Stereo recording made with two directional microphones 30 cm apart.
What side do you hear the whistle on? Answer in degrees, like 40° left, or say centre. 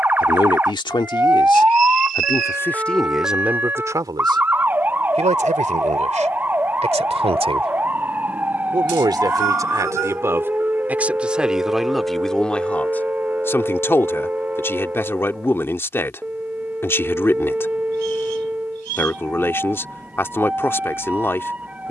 60° right.